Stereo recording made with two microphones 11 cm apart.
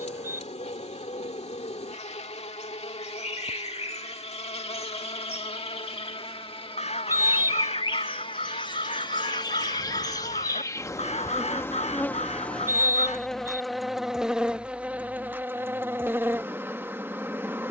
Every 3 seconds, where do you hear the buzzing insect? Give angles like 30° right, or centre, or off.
60° left, 60° left, 40° left, 30° left, centre, 20° right.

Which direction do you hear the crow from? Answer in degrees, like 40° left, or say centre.
60° left.